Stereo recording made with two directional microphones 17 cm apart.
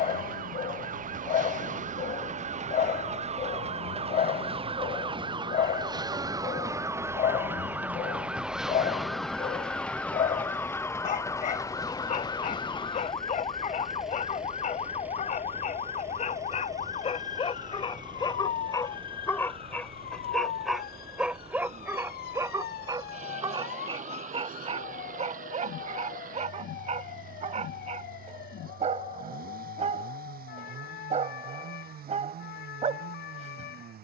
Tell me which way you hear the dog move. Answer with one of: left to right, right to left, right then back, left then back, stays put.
left to right.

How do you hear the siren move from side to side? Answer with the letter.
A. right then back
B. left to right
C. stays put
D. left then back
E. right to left
E.